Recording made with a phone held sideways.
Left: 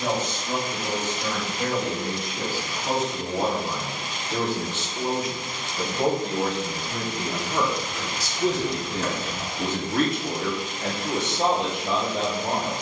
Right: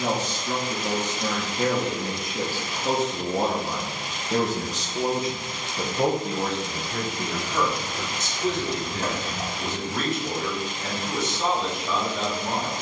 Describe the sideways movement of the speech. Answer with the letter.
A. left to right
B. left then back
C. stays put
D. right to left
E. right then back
D.